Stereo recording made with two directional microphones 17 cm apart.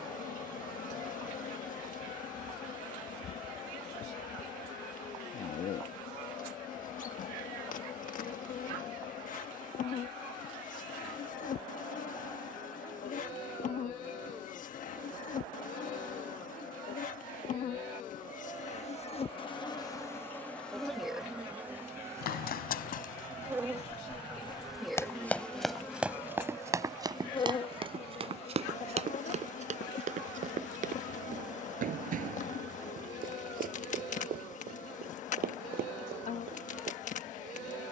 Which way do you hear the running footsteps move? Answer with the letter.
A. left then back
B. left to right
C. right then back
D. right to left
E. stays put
B.